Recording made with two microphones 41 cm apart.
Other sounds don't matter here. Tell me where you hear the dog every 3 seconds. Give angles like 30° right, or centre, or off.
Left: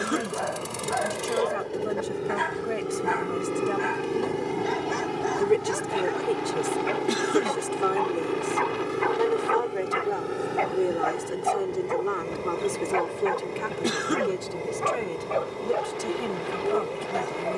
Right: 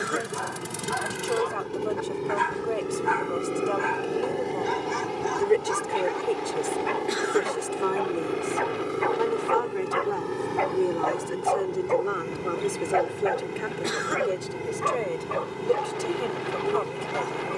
20° right, 20° right, centre, 30° left, 10° left, 10° right.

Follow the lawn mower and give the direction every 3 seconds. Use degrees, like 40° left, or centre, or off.
20° right, 20° left, 20° left, 10° right, 30° right, 30° right.